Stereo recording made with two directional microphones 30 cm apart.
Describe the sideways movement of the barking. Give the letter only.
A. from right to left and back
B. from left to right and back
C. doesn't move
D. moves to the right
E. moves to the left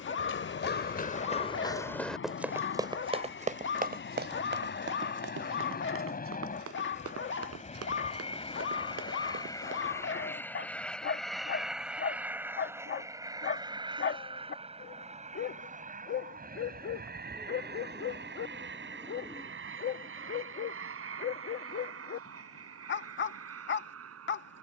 C.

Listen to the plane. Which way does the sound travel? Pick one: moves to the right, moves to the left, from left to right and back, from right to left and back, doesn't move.
moves to the right.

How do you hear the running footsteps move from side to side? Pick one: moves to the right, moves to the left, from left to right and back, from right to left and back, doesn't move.
moves to the right.